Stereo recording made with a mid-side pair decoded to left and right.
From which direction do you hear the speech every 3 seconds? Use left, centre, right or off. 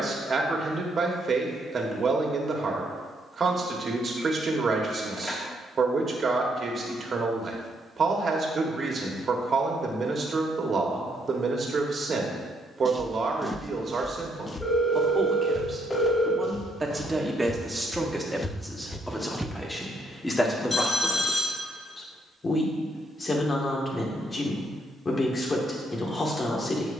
right, right, right, right, right, right, centre, left, left.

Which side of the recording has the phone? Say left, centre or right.
left.